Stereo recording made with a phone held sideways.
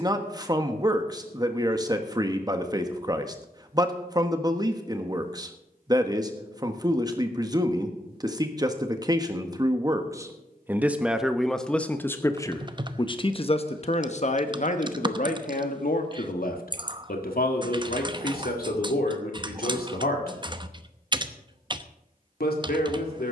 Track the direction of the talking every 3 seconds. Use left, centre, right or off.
right, right, right, centre, left, left, left, left.